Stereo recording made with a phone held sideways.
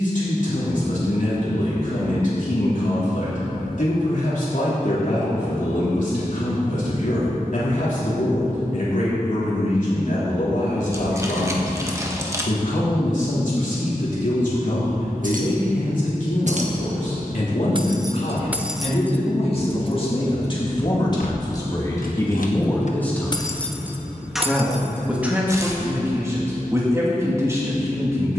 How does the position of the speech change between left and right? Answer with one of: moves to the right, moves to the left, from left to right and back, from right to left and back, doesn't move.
moves to the right.